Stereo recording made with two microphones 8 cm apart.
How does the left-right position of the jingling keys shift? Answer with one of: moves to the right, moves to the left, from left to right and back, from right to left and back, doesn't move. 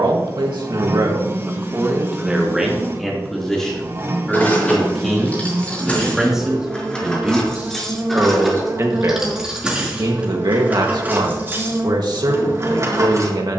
moves to the right.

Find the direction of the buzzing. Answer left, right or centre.
right.